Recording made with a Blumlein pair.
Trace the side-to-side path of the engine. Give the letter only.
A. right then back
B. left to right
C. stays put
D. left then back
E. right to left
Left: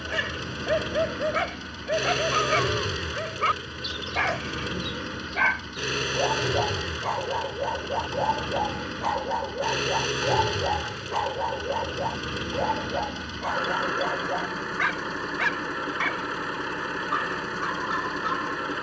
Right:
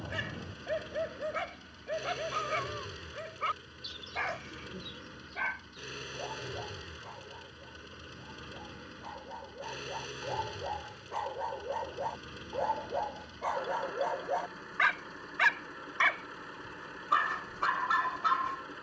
C.